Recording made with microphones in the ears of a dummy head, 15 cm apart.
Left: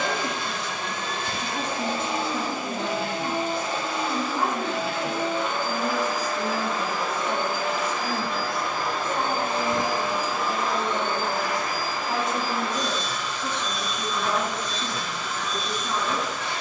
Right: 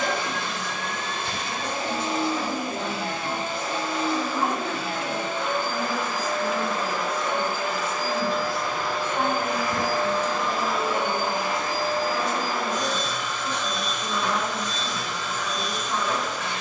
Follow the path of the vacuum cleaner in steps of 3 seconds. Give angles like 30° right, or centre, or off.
60° left, 60° left, 50° left, centre, 40° right, 60° right.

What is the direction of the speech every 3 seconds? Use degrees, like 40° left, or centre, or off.
50° left, 40° left, 20° left, 10° right, 50° left, 50° left.